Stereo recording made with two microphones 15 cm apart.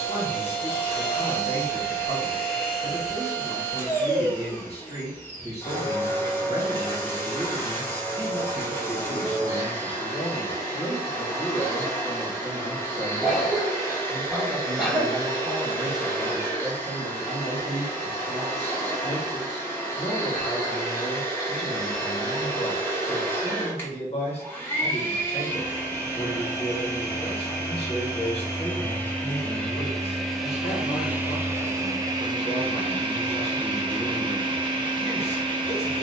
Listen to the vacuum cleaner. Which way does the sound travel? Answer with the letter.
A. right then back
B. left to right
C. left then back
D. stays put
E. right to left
B.